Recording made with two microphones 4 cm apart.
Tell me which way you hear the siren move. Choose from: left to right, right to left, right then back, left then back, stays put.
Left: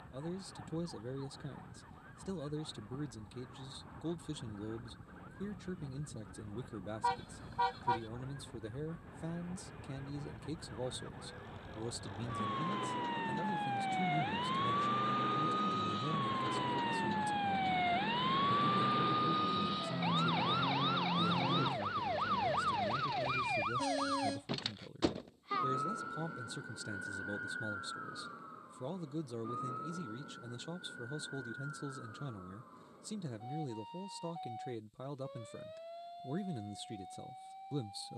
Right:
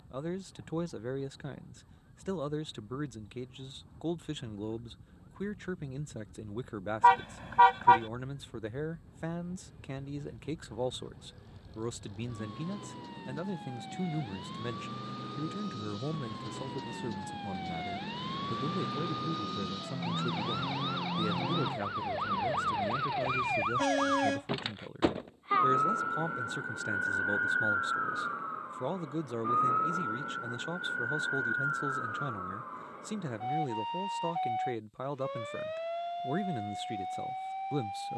left to right.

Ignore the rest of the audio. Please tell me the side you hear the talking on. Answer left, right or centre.
right.